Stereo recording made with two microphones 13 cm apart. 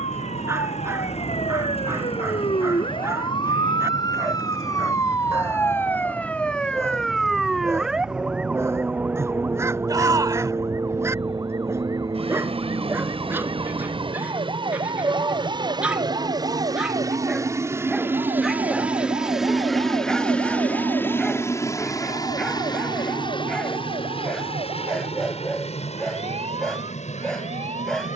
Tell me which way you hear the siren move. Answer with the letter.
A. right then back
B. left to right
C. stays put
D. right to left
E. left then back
B.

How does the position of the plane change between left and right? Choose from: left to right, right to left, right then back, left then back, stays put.
right to left.